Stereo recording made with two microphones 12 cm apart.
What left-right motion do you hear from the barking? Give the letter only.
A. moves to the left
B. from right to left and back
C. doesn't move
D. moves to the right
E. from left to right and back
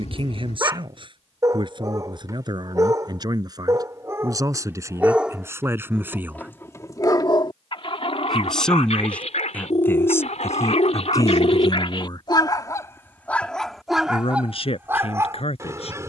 B.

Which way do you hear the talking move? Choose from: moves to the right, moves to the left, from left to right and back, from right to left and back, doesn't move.
moves to the left.